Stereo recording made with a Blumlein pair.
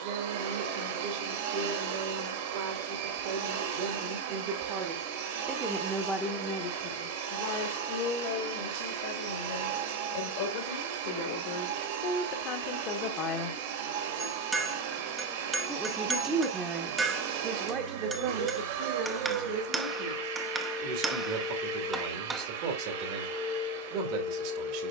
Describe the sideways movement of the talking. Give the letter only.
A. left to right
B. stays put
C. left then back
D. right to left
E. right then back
C.